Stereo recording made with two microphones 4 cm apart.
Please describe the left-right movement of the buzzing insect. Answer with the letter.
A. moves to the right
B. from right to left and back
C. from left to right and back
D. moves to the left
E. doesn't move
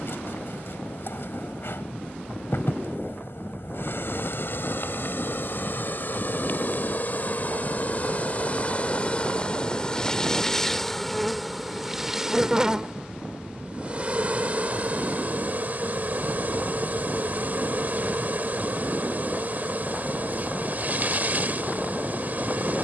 A.